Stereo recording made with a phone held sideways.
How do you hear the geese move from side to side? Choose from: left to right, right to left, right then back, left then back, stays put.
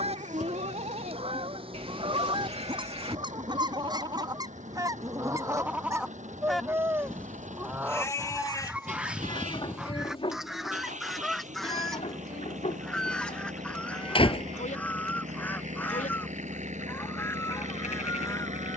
right to left.